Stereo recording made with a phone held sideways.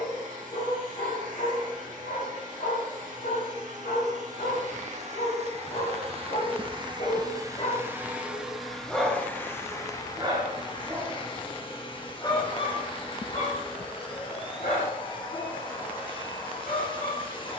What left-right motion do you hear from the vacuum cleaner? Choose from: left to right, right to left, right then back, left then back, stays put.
right to left.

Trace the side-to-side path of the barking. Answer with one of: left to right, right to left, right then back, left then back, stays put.
right then back.